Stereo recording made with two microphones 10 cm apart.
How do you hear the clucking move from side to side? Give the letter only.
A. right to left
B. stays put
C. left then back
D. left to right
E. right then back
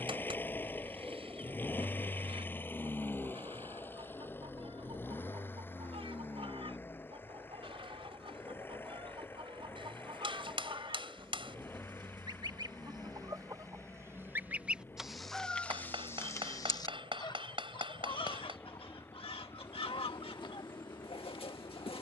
A.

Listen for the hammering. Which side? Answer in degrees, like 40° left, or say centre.
60° right.